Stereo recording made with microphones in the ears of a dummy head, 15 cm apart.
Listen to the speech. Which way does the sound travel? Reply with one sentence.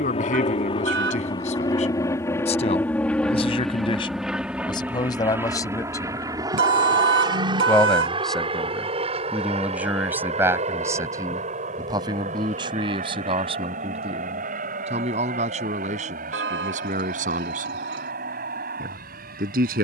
You can hear the speech move from left to right.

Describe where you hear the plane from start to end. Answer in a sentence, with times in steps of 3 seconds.
You can hear the plane on the left from 0 s, in the centre from 3 s and on the right from 6 s.